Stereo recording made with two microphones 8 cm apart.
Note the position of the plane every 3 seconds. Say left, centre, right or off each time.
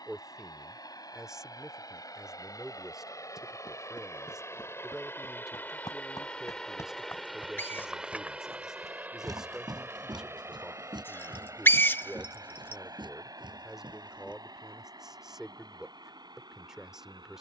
left, left, centre, right, right, right.